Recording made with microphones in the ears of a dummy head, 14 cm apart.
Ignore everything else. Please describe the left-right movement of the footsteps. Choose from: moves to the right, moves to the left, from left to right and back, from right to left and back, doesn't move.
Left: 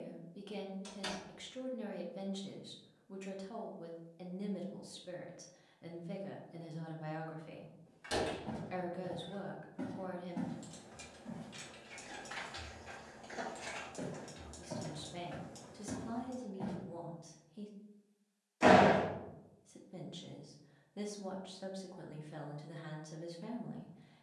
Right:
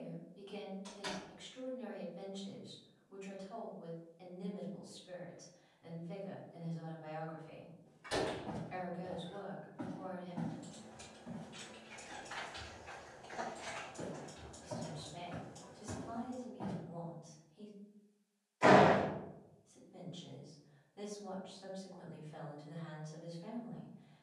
from right to left and back.